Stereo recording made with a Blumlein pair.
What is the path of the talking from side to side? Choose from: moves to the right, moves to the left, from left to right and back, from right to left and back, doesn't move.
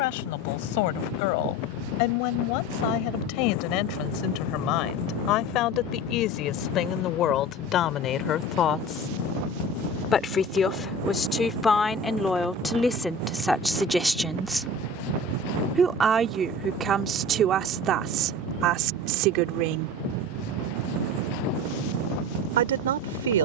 moves to the right.